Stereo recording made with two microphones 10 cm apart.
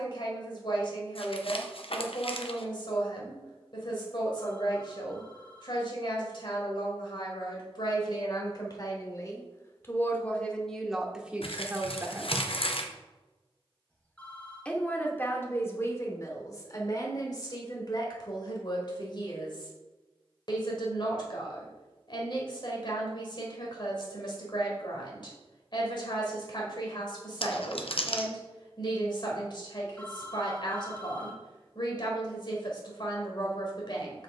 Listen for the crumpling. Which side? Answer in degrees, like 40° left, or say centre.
70° left.